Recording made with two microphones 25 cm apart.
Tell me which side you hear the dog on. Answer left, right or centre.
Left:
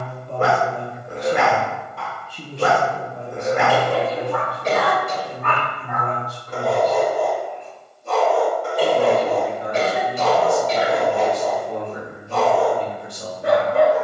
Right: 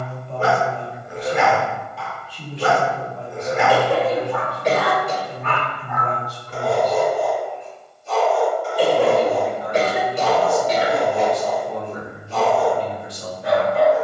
left.